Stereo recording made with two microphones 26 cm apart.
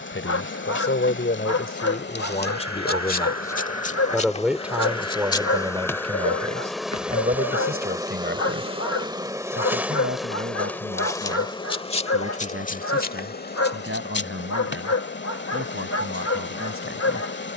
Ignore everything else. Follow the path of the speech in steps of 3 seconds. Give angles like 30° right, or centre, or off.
40° left, centre, 30° right, 50° right, 50° right, 50° right.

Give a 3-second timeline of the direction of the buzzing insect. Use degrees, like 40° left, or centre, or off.
40° left, 20° left, 10° right, centre, 40° left, 40° left.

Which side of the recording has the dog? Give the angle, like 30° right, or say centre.
70° left.